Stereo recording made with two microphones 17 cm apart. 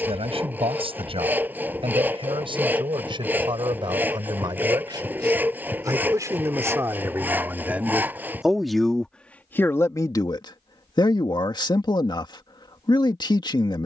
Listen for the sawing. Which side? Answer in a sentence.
In this clip you hear the sawing in the centre.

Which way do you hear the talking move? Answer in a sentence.
In this clip you hear the talking move from right to left.